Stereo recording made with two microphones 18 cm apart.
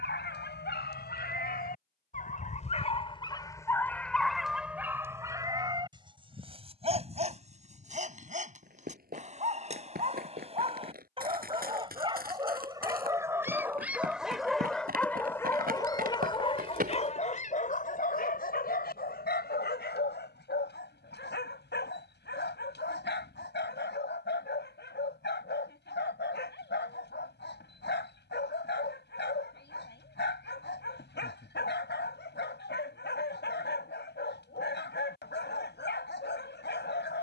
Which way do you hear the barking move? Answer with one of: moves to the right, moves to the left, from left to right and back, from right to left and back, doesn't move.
from left to right and back.